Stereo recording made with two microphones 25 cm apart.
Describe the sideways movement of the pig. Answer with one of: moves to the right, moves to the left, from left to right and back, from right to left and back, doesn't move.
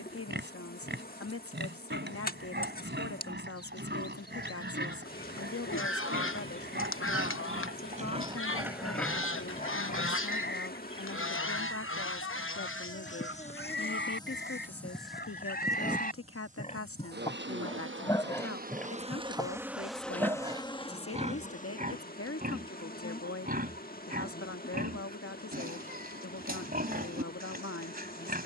from right to left and back.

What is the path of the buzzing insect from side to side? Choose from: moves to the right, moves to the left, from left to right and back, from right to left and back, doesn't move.
from left to right and back.